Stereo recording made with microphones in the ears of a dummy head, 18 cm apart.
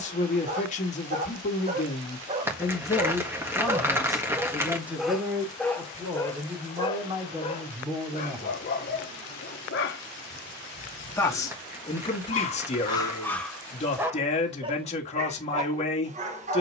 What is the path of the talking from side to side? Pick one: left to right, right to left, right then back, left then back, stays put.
right then back.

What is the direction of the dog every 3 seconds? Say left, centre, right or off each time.
right, centre, left, left, centre, right.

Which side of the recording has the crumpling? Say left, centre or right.
centre.